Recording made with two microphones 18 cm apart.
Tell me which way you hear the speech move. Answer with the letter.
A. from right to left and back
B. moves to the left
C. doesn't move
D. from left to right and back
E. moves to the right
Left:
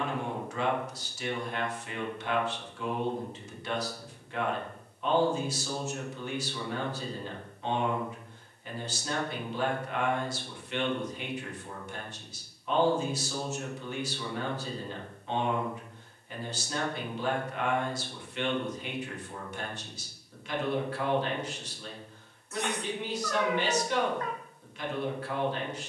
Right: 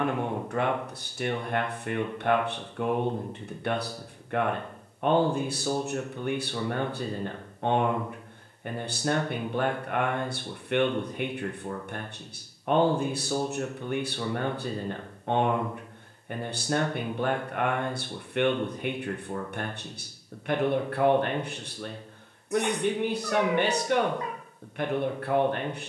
C.